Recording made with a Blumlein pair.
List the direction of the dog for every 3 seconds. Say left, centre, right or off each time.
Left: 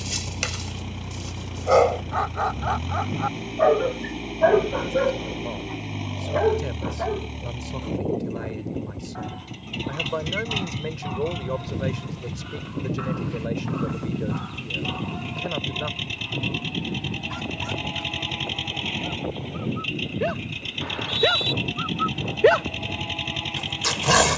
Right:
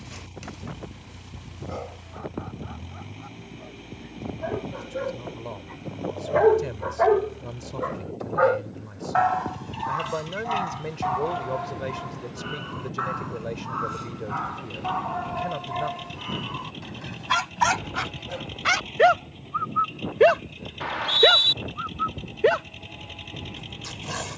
left, left, right, right, right, right, right, centre.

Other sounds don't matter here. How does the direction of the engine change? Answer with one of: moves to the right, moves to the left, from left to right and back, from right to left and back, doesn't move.
doesn't move.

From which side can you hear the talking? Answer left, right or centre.
centre.